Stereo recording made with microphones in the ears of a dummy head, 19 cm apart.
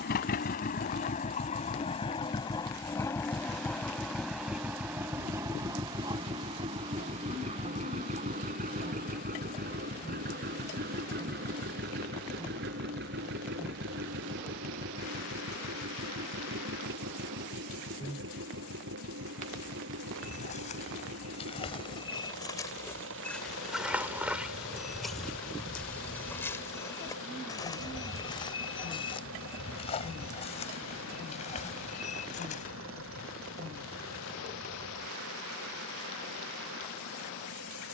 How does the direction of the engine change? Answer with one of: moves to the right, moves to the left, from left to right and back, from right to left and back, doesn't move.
moves to the right.